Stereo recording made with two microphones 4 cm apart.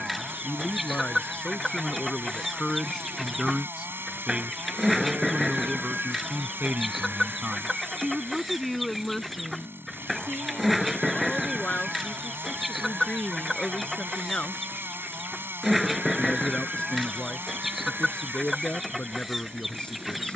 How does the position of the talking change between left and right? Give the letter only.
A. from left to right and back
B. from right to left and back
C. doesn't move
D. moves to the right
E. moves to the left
A.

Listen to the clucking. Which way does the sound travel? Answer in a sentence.
You can hear the clucking stay put.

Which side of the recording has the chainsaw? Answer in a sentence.
In this clip you hear the chainsaw on the right.